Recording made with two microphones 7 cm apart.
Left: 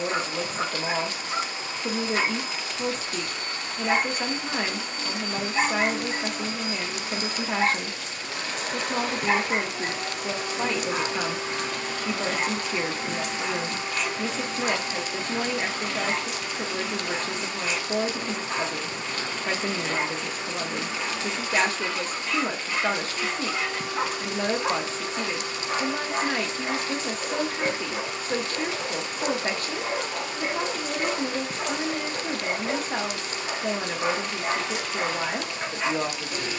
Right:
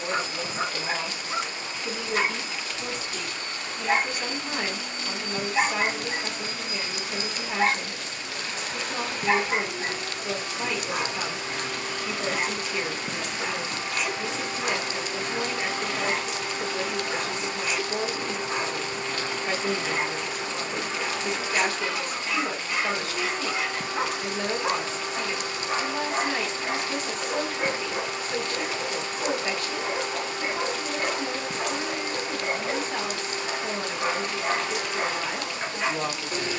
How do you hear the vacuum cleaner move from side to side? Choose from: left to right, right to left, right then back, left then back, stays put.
left to right.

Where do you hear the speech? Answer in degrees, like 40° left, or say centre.
40° left.